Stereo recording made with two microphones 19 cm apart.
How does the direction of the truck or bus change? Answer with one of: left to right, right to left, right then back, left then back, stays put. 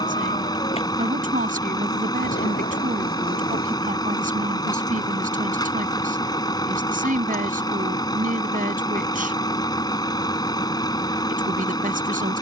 stays put.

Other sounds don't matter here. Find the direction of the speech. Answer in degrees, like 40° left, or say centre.
50° right.